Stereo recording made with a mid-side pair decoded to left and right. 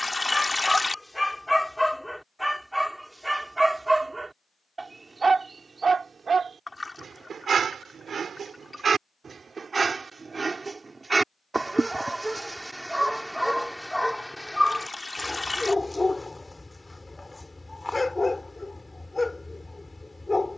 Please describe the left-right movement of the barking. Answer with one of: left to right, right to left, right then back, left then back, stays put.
right then back.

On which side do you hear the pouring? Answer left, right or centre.
centre.